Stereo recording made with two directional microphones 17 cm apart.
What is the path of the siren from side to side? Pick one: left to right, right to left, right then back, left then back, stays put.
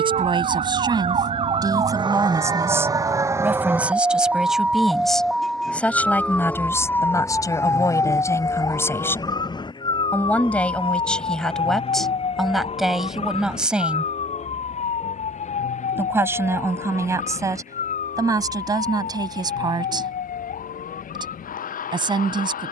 right to left.